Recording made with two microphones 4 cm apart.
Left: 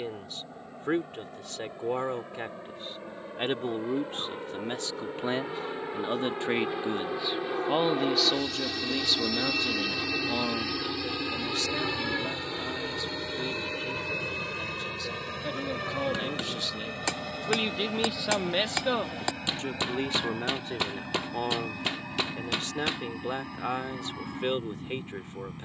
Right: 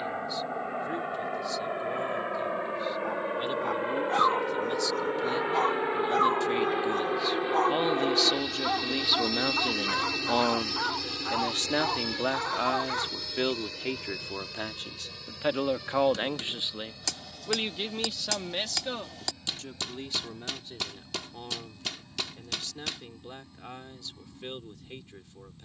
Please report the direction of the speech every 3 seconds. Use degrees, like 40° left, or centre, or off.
50° left, 40° left, 10° left, 30° right, 60° right, 30° right, 40° left, 50° left, 50° left.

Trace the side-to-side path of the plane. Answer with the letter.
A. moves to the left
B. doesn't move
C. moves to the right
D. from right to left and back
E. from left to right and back
A.